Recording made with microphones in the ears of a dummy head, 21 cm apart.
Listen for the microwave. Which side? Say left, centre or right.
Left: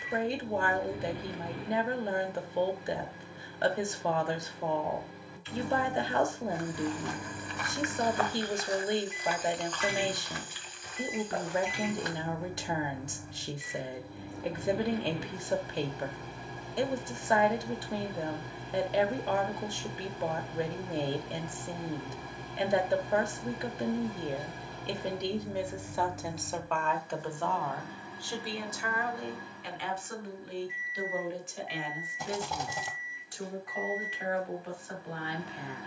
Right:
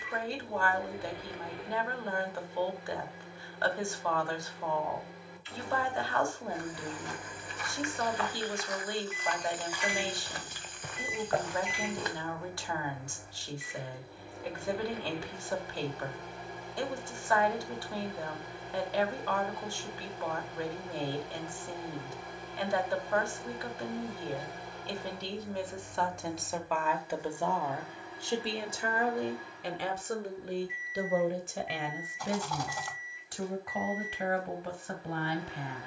left.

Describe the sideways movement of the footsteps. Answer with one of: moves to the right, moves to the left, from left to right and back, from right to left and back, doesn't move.
moves to the right.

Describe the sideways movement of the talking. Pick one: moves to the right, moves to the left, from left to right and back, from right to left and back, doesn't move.
moves to the right.